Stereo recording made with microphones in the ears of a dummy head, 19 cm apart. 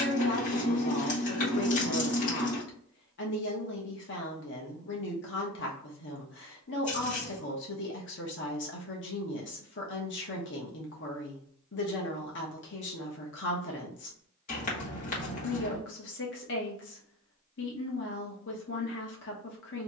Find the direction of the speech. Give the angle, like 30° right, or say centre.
60° left.